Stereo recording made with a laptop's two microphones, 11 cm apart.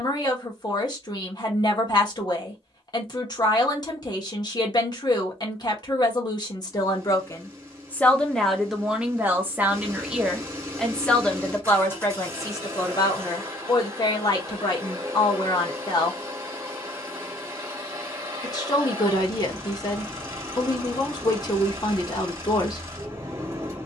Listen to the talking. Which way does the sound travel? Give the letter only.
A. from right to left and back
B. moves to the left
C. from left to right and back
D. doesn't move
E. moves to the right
C.